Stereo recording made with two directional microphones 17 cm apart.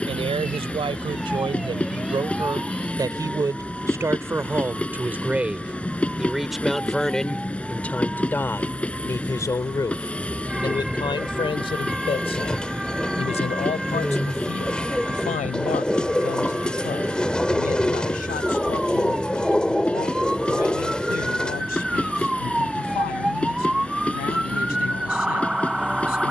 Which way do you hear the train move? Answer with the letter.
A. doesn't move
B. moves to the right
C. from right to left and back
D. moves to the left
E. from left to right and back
A.